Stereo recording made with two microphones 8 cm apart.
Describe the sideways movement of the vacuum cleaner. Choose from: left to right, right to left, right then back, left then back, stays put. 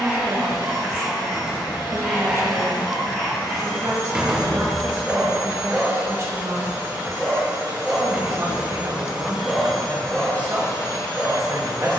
right then back.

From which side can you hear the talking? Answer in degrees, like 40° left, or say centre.
40° right.